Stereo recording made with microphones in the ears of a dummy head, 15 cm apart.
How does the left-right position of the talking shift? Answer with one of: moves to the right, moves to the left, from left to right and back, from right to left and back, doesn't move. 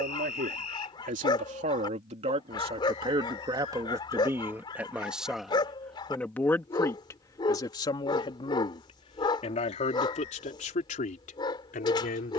moves to the left.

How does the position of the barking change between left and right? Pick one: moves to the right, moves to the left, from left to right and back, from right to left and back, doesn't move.
doesn't move.